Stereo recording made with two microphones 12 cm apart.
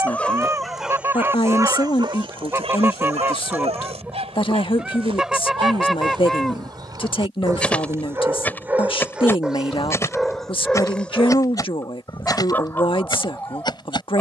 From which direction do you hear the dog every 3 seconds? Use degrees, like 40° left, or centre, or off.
30° right, 60° right, 30° right, centre, 20° left.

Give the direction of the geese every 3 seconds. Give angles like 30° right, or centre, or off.
20° right, 10° right, 10° left, 20° left, 40° left.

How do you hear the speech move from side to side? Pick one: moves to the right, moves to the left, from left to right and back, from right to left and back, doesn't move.
doesn't move.